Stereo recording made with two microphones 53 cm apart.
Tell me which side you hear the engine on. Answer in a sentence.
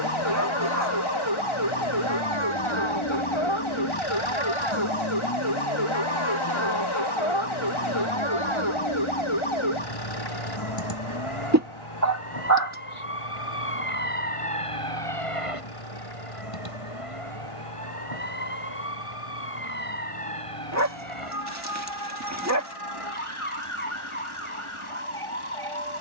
In this clip you hear the engine on the left.